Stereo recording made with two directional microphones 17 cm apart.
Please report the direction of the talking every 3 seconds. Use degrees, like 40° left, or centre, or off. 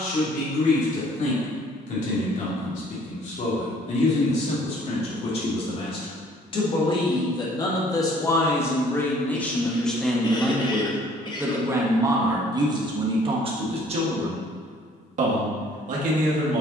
50° left, 40° left, 20° left, centre, 30° right, 50° right.